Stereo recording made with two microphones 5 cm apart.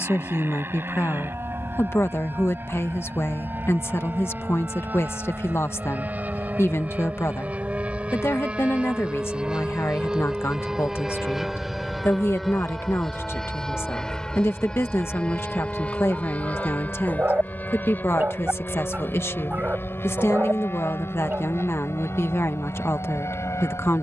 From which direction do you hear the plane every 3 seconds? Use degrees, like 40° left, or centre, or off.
50° right, 40° right, 30° right, 10° right, 10° left, 30° left, 40° left, 50° left.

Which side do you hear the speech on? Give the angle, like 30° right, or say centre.
50° left.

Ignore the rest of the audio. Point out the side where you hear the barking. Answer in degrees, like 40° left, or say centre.
40° right.